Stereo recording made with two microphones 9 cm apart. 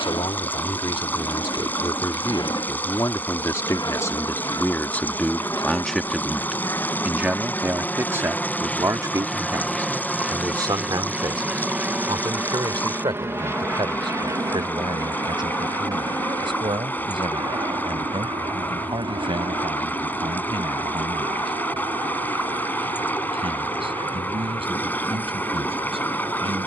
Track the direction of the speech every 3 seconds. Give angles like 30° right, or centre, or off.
50° left, 20° left, 20° right, 40° right, 60° right, 60° right, 70° right, 70° right, 70° right.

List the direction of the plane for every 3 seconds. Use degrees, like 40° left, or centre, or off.
60° left, 40° left, 20° left, centre, 30° right, 40° right, 50° right, 60° right, 60° right.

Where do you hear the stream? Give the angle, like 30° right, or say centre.
20° left.